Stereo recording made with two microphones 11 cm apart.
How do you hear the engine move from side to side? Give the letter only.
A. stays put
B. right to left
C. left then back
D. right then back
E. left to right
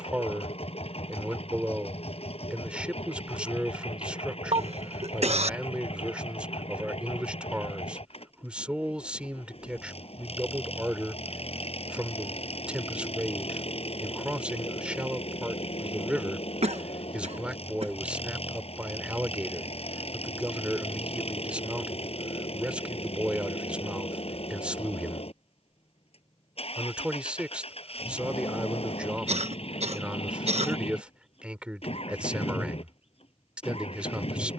A.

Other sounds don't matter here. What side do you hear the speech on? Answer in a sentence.
In this clip you hear the speech in the centre.